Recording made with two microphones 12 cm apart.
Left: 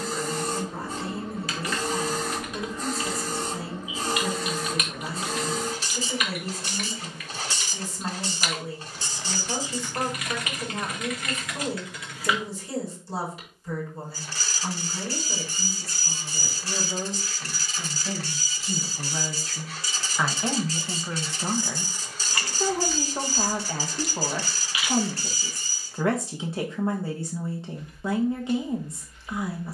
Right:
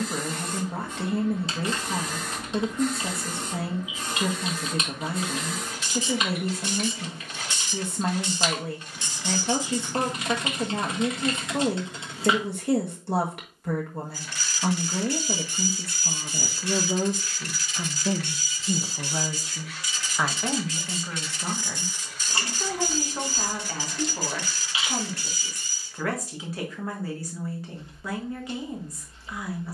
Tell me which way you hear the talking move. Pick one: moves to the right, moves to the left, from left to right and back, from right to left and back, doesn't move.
moves to the left.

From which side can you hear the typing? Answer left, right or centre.
right.